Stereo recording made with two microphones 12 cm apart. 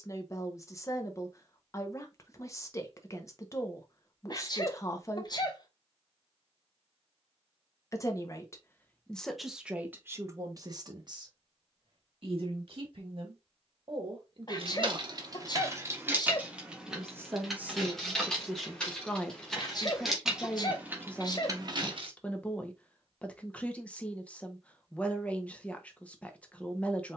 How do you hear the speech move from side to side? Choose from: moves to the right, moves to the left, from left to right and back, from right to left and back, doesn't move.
from left to right and back.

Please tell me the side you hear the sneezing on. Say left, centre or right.
left.